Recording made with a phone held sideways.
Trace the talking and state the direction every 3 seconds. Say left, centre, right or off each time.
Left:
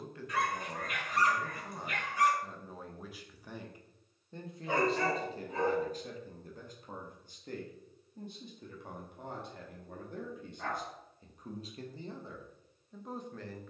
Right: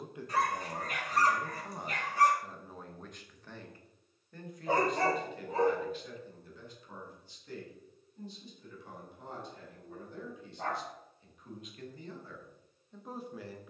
centre, left, left, left, centre.